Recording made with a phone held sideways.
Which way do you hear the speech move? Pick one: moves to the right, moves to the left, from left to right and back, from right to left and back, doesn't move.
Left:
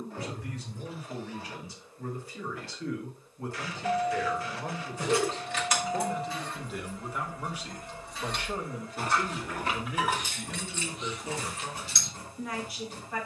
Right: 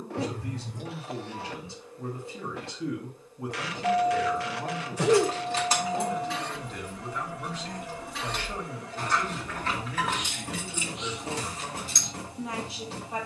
from right to left and back.